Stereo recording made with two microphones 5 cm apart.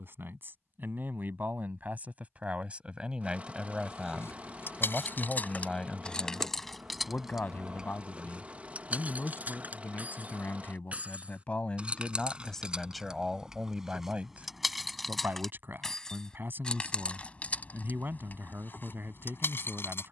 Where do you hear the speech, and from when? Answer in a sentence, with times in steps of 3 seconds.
In this clip you hear the speech on the right from 0 s, in the centre from 3 s, on the left from 6 s, in the centre from 12 s and on the right from 15 s.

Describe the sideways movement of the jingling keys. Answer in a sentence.
You can hear the jingling keys move from left to right and back again.